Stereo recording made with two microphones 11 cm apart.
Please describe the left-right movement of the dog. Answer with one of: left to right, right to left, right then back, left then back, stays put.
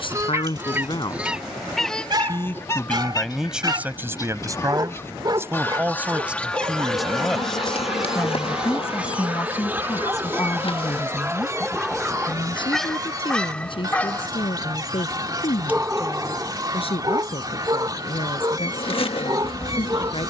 left then back.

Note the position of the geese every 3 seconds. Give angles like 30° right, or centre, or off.
centre, 30° left, centre, 20° right, 40° right, 40° right, 40° right.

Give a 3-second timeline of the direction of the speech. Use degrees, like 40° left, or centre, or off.
40° left, 20° right, centre, 40° left, 50° left, 60° left, 60° left.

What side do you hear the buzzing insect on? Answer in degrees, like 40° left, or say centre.
60° left.